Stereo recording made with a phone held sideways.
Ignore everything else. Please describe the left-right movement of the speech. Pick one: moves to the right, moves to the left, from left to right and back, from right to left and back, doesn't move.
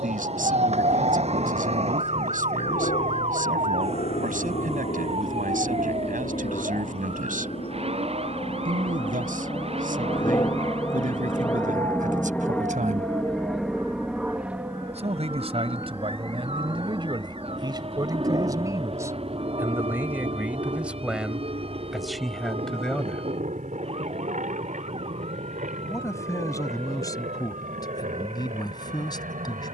moves to the left.